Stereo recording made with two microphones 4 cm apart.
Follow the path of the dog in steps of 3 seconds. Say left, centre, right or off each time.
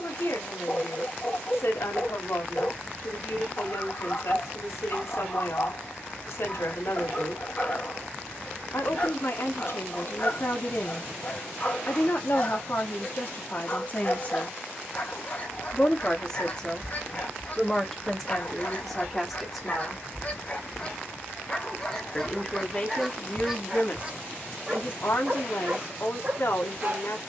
left, left, left, left, left, left, left, centre, right.